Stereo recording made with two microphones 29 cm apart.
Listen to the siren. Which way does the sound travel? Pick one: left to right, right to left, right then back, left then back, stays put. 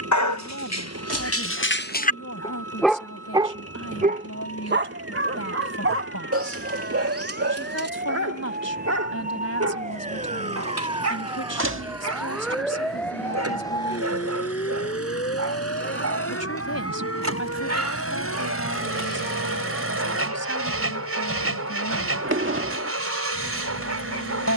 right to left.